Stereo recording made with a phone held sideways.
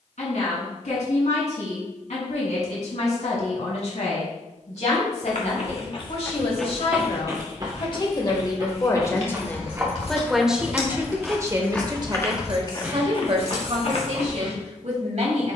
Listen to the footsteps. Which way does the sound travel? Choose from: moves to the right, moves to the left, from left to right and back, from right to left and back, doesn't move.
from left to right and back.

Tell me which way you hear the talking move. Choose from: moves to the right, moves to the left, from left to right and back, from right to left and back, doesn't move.
moves to the right.